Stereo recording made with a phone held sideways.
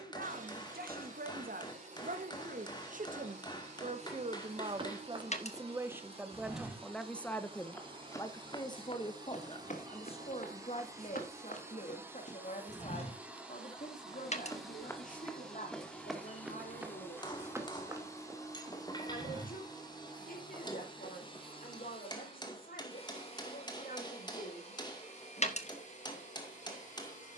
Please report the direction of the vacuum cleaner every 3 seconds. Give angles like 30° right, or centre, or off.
50° right, 40° right, 30° right, 20° right, 10° right, 10° left, 30° left, 40° left, 50° left.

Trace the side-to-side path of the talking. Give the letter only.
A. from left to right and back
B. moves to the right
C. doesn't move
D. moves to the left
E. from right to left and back
D.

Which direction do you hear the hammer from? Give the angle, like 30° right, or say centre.
30° left.